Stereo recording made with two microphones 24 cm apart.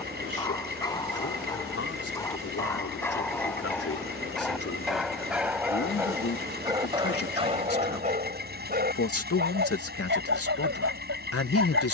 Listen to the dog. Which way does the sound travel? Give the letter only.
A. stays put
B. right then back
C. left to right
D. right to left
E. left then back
C.